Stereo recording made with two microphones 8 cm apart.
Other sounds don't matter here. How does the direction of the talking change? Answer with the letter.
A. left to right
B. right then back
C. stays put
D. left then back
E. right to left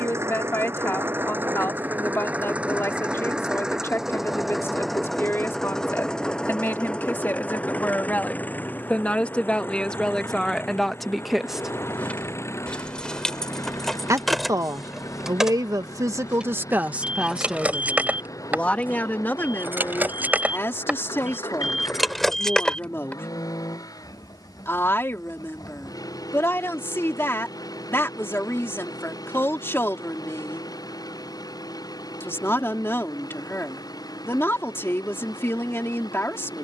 B.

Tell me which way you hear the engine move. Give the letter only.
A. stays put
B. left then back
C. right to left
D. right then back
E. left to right
C.